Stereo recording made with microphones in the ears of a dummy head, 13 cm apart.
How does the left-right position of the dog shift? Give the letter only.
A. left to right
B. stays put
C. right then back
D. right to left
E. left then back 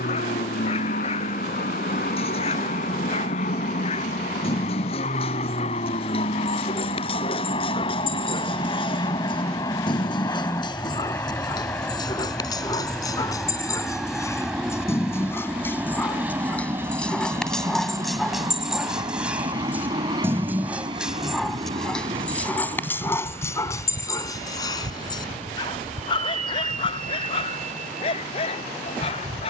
C.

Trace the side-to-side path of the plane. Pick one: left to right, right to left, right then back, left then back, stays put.
left to right.